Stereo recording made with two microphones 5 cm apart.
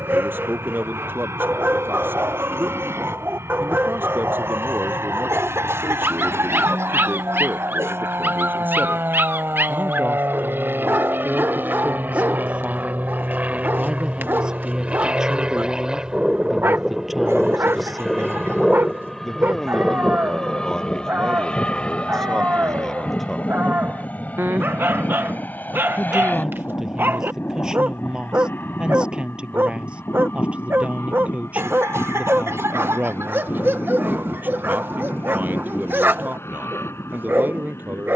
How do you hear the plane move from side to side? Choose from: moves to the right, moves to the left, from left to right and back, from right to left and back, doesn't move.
moves to the left.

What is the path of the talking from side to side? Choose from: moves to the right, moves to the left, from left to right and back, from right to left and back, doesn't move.
from right to left and back.